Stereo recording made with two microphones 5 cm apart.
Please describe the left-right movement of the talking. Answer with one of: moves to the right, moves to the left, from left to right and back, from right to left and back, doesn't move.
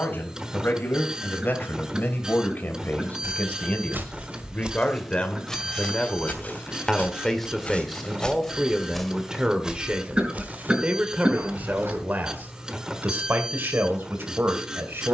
moves to the right.